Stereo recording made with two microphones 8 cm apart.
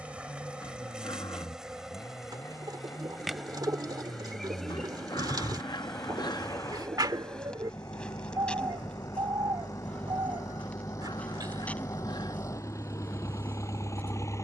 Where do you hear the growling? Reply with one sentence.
In this clip you hear the growling on the left.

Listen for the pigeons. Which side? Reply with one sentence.
In this clip you hear the pigeons on the right.